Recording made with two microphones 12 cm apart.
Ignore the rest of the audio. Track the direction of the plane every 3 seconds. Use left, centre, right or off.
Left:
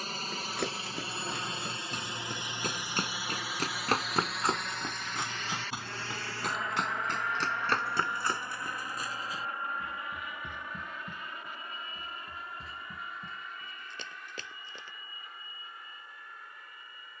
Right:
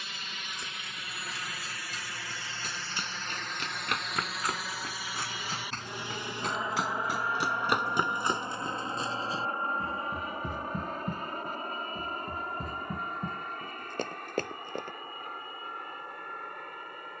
left, centre, right, right, right, right.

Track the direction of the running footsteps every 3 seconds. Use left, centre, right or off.
left, left, centre, right, right, off.